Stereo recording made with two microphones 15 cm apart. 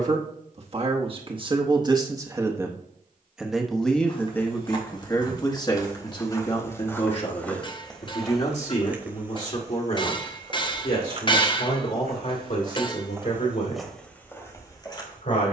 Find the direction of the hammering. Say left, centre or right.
left.